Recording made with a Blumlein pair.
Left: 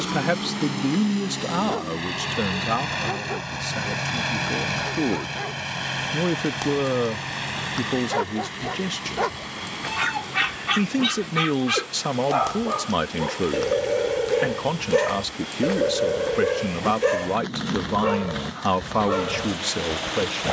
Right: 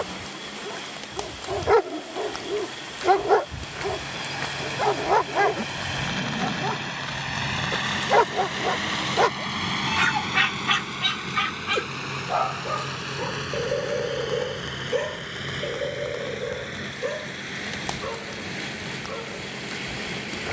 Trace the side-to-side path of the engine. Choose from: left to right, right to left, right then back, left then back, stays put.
left to right.